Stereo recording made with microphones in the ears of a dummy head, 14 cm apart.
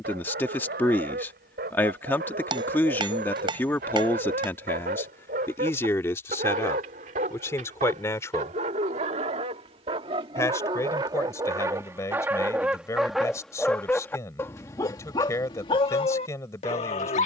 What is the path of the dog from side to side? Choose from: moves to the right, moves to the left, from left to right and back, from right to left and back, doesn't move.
moves to the left.